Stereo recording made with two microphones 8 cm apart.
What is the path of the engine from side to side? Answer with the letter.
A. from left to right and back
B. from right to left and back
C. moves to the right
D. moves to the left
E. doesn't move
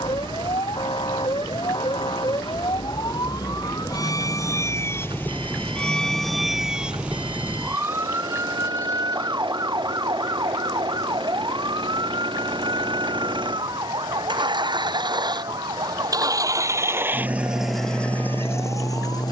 D.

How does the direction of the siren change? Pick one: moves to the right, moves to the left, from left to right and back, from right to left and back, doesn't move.
moves to the right.